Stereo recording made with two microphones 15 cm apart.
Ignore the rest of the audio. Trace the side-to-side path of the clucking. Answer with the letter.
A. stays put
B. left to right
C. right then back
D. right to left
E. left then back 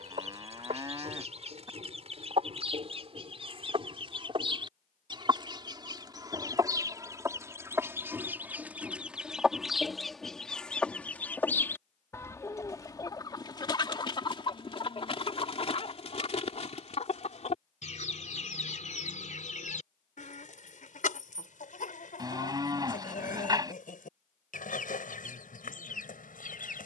D.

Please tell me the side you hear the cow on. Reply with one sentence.
You can hear the cow on the right.